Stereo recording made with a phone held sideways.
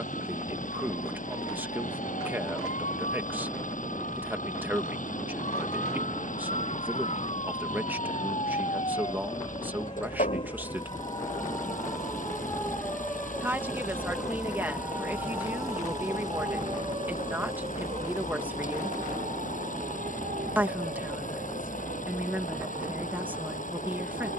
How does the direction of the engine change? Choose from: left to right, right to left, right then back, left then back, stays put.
stays put.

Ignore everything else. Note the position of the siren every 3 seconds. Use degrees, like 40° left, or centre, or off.
60° left, 50° left, 40° left, 30° left, centre, 30° right, 50° right, 70° right.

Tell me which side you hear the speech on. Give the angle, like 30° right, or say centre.
10° right.